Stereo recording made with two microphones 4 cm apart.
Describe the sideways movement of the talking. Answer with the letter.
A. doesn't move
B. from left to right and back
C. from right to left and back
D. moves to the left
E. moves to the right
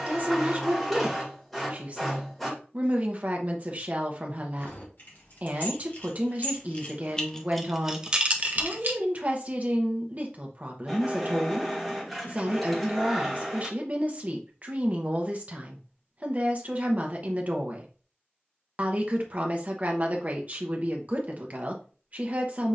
A.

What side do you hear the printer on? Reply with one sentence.
In this clip you hear the printer in the centre.